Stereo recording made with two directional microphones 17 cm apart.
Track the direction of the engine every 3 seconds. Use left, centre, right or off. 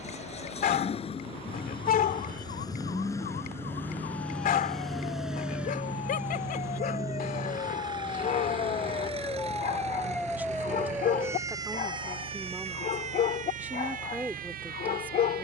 left, centre, right, right, right.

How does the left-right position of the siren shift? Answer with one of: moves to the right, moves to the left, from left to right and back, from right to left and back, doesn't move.
moves to the right.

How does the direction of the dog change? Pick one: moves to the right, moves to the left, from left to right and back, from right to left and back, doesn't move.
doesn't move.